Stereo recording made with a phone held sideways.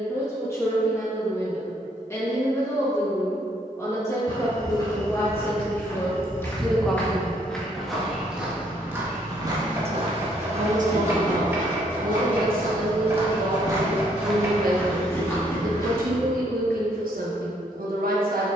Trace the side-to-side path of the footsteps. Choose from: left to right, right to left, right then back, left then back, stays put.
right then back.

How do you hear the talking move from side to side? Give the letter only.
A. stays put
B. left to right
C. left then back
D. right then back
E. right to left
B.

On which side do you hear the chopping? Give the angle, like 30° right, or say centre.
20° right.